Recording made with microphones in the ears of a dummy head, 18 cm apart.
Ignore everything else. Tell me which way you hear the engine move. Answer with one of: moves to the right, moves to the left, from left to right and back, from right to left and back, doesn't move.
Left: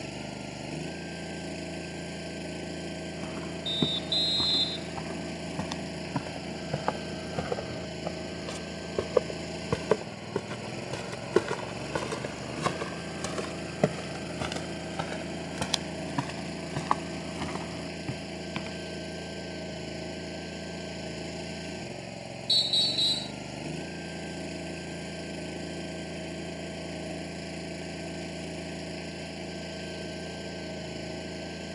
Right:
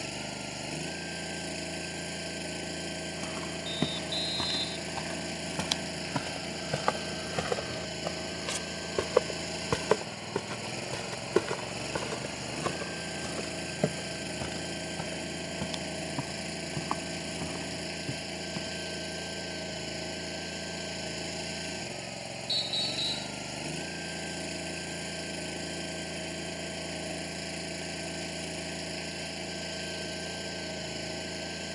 doesn't move.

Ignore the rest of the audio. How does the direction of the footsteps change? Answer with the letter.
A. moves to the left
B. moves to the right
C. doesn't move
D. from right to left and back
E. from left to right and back
A.